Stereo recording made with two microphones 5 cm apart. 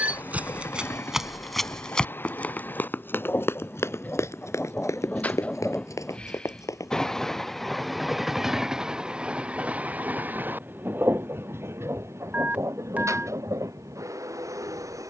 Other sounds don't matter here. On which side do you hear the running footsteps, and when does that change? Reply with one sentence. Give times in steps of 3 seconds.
In this clip you hear the running footsteps in the centre from 0 s, on the left from 3 s and not at all from 9 s.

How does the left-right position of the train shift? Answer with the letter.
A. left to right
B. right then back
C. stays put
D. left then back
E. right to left
A.